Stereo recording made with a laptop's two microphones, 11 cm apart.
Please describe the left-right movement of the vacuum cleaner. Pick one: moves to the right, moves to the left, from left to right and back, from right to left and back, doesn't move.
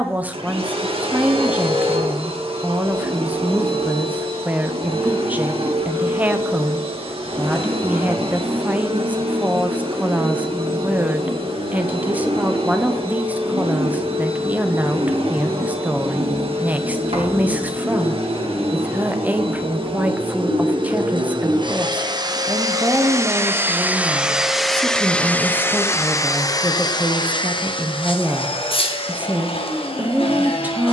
moves to the left.